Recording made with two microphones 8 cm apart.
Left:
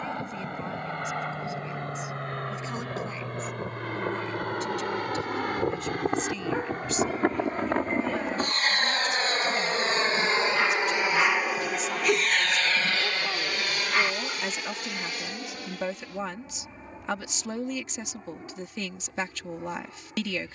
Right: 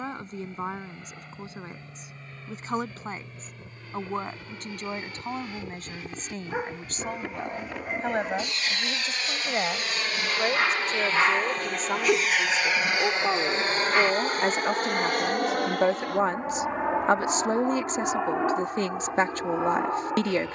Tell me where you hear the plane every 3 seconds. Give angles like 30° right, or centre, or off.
70° left, 60° left, 50° left, 20° left, 20° right, 50° right, 70° right.